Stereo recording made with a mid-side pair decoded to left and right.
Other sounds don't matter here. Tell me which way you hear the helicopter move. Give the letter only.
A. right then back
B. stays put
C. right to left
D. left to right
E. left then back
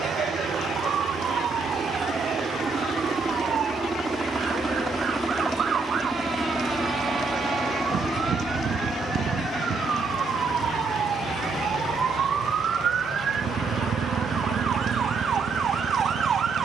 C.